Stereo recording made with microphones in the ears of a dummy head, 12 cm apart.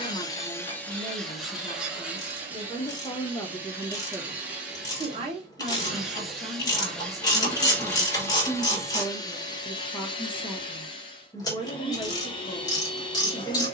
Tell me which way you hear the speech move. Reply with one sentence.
In this clip you hear the speech go right and come back.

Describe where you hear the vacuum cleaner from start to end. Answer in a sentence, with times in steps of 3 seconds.
In this clip you hear the vacuum cleaner in the centre from 0 s and on the left from 9 s.